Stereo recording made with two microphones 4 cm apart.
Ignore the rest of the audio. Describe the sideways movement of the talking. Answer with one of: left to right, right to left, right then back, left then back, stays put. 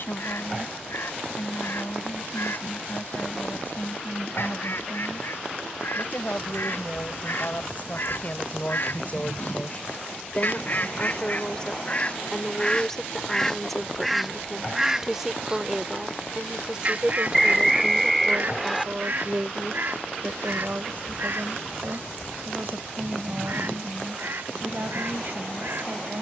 left to right.